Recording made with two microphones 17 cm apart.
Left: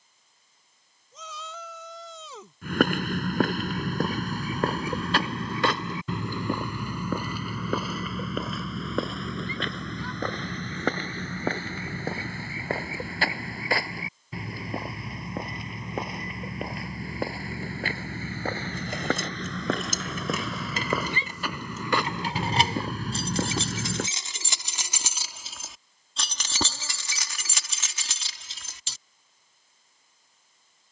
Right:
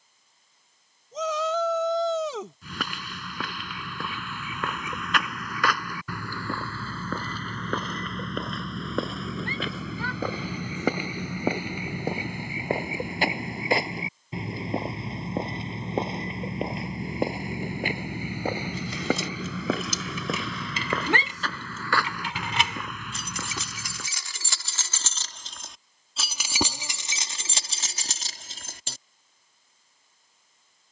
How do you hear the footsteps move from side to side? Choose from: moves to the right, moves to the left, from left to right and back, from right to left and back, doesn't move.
from left to right and back.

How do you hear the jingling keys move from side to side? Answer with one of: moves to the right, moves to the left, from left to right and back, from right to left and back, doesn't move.
moves to the right.